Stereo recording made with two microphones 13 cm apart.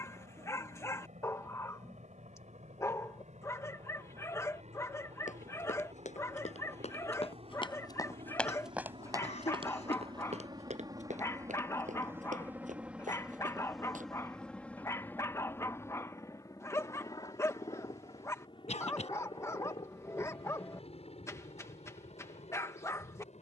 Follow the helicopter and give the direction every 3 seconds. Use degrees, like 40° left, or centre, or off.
70° right, 60° right, 50° right, 30° right, centre, 20° left, 40° left, 50° left.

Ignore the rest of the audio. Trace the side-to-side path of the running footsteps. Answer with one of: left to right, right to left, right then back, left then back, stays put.
left to right.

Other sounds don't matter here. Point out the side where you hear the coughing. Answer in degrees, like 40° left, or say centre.
60° left.